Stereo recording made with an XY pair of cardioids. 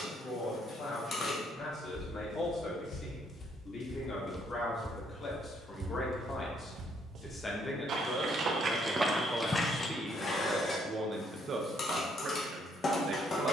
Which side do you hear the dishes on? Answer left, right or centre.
left.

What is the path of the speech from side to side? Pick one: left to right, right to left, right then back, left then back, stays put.
left to right.